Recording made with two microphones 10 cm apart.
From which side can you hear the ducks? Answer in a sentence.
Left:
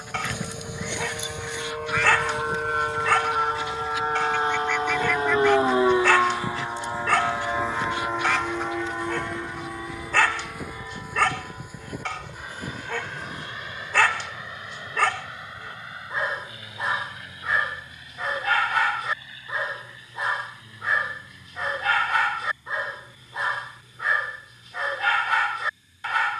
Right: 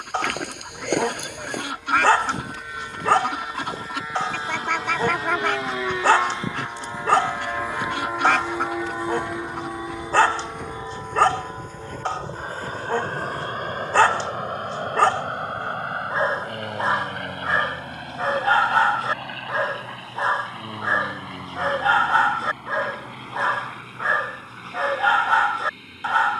You can hear the ducks on the right.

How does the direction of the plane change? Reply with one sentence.
You can hear the plane move to the right.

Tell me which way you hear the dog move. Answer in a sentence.
In this clip you hear the dog stay in one place.